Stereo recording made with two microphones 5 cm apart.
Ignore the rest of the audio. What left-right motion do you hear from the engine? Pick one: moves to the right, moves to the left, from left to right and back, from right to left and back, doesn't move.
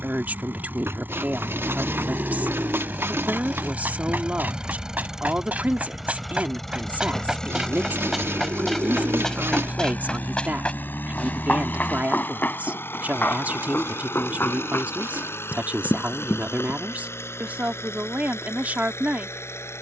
moves to the left.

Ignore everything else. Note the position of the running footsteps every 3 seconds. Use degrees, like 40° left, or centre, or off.
60° right, 40° right, 10° right, 20° left, 40° left, 50° left, off.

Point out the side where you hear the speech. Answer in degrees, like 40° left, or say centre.
40° right.